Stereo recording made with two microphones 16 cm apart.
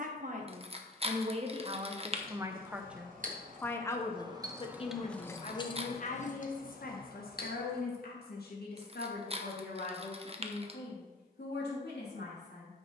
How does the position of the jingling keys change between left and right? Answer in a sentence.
You can hear the jingling keys move to the left.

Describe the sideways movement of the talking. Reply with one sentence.
You can hear the talking go from the right side to the left.